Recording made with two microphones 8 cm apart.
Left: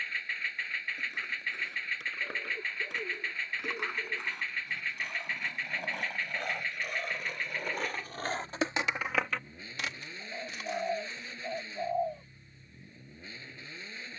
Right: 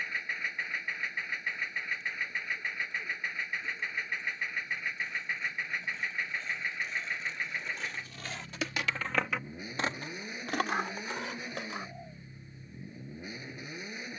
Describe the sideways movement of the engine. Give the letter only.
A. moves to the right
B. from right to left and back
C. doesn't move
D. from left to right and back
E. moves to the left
C.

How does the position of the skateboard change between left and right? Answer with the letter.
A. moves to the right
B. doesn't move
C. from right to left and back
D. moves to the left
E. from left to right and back
A.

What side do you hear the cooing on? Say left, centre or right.
left.